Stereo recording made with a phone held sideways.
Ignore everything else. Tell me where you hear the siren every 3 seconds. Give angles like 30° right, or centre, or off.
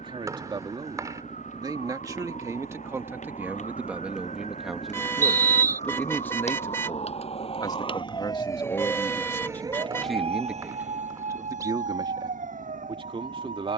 70° left, 70° left, 40° left, 50° right, 80° right.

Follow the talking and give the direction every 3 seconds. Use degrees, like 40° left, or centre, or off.
30° right, 10° right, 30° left, centre, 40° right.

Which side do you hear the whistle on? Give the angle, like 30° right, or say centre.
20° right.